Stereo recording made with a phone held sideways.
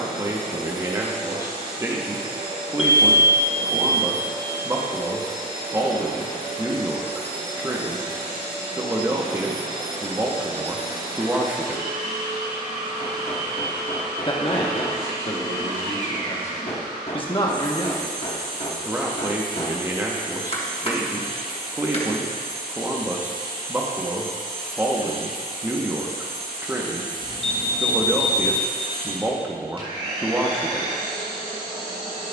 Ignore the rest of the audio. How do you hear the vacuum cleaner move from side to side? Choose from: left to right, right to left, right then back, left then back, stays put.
stays put.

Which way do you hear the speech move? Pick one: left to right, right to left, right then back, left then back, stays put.
left then back.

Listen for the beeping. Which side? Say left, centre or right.
left.